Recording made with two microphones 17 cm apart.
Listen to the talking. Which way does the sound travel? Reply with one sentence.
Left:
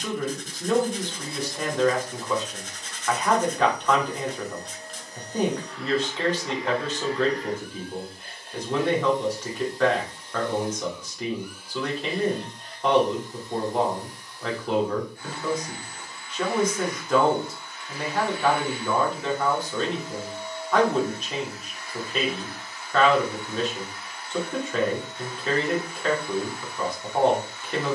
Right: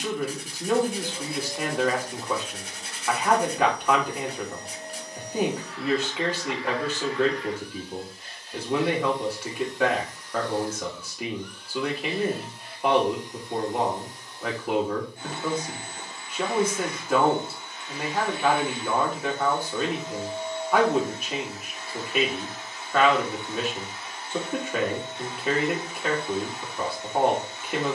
In this clip you hear the talking stay in one place.